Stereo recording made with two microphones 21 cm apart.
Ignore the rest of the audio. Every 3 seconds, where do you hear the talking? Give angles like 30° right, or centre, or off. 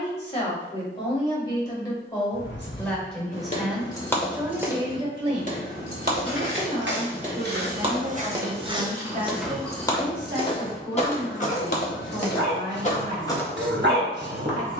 20° left, 10° right, 50° right, 70° right, 70° right.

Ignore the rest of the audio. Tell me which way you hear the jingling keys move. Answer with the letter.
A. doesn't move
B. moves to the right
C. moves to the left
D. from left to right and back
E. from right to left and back
D.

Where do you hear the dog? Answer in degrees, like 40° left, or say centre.
60° right.